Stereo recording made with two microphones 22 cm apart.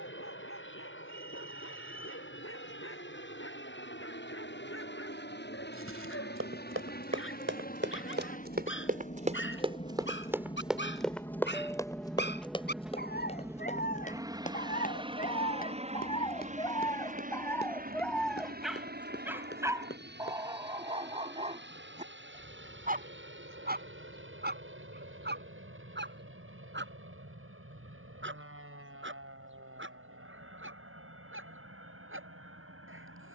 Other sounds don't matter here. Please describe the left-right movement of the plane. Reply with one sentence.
In this clip you hear the plane move from left to right.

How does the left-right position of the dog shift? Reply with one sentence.
You can hear the dog go from the left side to the right.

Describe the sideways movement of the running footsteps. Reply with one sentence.
You can hear the running footsteps go from the right side to the left.